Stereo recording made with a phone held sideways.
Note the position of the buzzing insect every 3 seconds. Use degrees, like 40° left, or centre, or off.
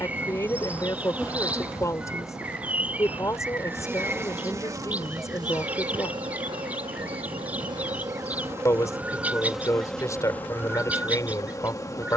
centre, 20° right, 30° right, 10° left.